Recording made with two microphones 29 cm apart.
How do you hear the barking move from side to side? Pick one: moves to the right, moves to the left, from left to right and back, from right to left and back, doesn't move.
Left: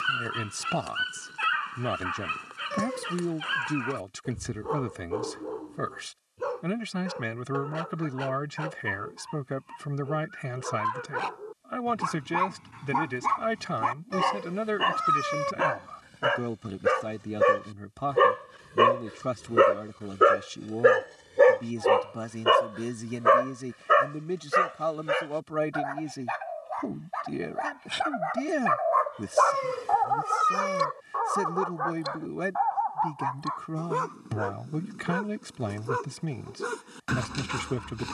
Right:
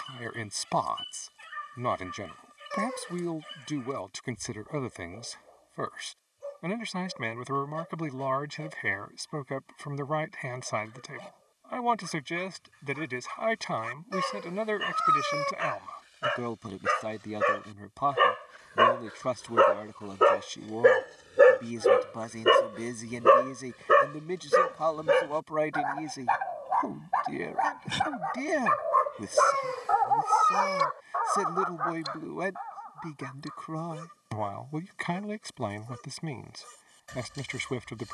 from left to right and back.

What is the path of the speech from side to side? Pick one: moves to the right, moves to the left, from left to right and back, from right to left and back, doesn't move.
doesn't move.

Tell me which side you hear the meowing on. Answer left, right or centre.
left.